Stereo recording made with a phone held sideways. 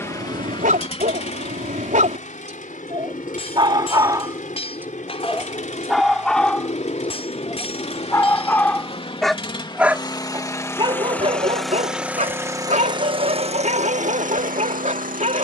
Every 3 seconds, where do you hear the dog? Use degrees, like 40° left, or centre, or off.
50° right, 20° right, 10° left, 30° right, 50° right.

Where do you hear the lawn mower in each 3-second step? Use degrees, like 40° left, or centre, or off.
40° left, 50° left, 40° left, 20° left, 40° right.